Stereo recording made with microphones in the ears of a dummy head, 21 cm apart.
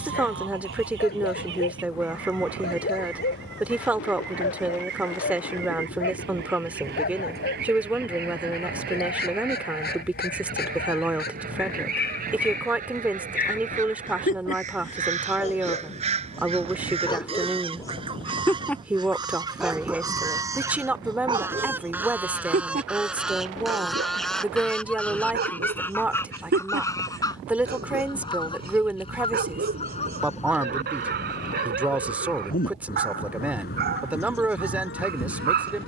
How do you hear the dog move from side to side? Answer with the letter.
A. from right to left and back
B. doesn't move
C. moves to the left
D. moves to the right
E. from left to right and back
D.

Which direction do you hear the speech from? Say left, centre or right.
centre.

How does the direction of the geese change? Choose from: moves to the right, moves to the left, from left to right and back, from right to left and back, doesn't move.
moves to the left.